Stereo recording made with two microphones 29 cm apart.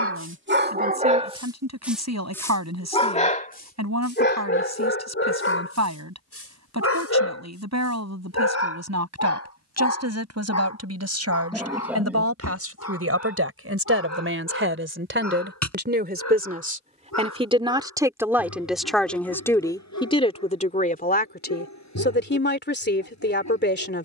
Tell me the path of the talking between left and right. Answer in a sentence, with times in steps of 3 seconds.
You can hear the talking on the right from 0 s, in the centre from 18 s and on the left from 21 s.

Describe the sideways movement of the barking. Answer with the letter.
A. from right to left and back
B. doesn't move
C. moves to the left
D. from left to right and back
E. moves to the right
C.